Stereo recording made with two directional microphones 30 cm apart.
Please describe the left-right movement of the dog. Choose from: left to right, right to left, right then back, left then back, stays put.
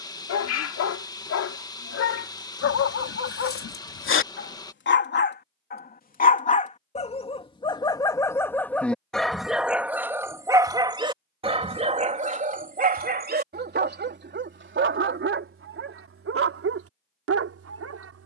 left to right.